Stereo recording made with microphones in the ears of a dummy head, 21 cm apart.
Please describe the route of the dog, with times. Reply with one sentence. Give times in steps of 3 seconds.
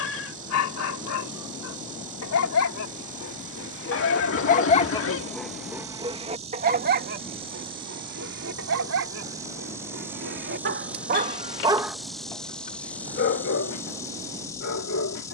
You can hear the dog on the left from 0 s, on the right from 6 s and on the left from 12 s.